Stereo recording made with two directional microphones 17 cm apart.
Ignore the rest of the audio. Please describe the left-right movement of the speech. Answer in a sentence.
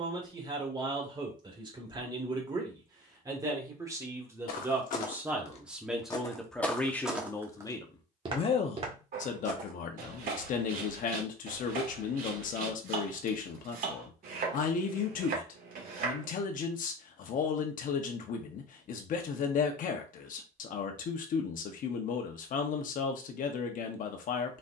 You can hear the speech travel towards the left.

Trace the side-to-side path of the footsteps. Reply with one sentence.
You can hear the footsteps move to the right.